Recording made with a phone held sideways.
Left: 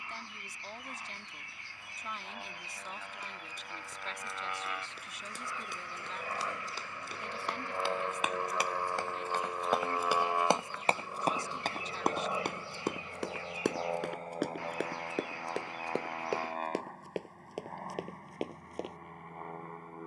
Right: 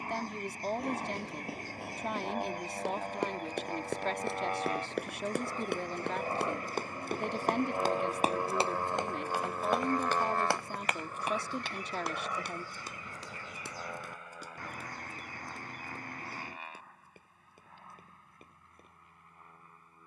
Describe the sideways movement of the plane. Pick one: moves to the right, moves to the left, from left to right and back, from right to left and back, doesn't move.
moves to the left.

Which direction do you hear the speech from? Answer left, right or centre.
right.